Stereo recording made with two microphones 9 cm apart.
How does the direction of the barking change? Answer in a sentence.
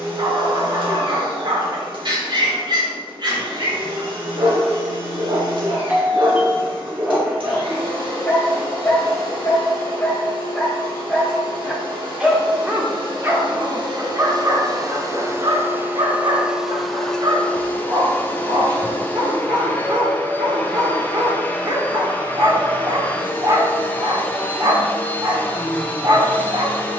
In this clip you hear the barking go left and come back.